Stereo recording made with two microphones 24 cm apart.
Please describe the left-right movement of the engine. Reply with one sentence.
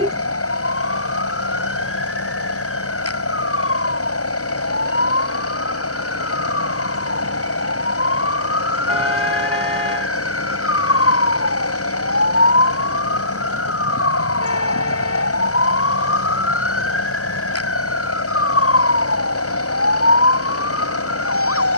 You can hear the engine stay put.